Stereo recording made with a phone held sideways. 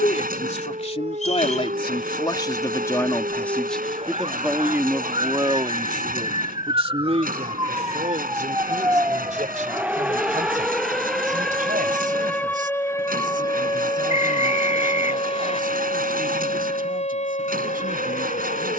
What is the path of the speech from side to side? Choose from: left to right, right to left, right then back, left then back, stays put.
left to right.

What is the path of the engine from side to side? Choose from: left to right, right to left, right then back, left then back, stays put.
stays put.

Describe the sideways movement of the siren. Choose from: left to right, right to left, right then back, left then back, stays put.
right to left.